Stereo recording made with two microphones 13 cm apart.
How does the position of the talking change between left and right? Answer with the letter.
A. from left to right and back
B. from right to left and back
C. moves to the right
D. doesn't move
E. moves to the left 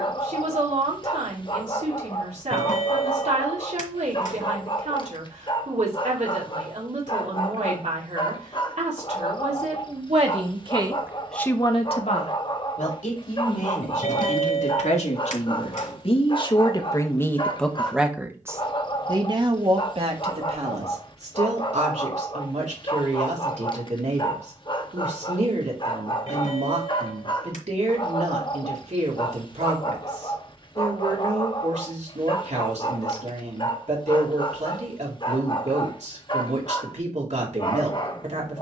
B.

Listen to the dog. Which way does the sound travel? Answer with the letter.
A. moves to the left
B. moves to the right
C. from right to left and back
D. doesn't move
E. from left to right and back
D.